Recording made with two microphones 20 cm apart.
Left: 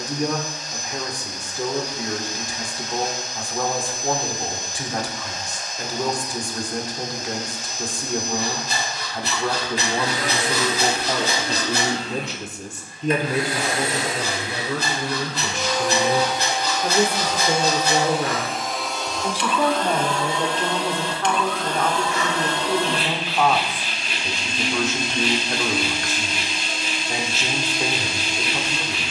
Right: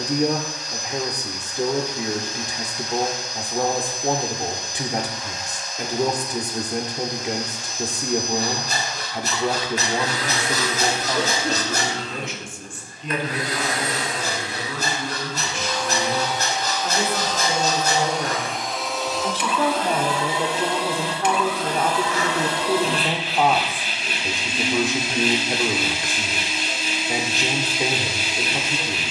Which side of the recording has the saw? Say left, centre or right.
right.